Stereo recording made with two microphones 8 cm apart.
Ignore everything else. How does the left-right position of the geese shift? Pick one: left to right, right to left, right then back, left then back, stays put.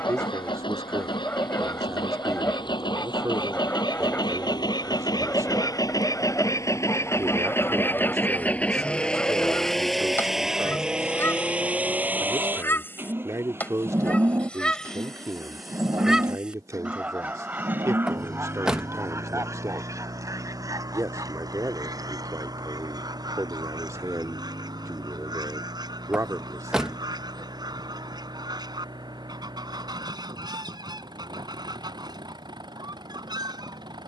left to right.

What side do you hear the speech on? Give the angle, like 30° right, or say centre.
40° right.